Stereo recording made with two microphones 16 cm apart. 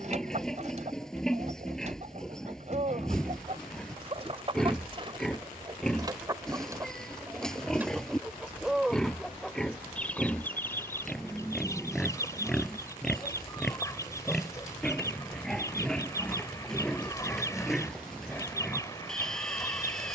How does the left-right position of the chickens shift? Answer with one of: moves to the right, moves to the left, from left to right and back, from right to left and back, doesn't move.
moves to the left.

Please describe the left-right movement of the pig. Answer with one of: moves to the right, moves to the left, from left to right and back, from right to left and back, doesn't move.
doesn't move.